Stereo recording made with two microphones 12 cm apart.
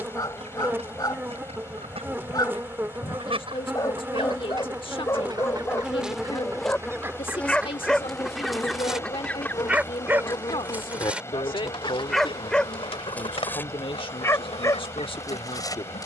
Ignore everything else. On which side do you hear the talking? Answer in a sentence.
In this clip you hear the talking on the left.